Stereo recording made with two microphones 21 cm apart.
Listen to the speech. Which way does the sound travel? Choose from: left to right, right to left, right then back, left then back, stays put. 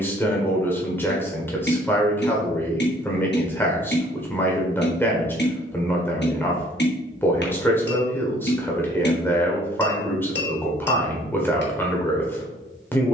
stays put.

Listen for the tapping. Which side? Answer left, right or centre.
left.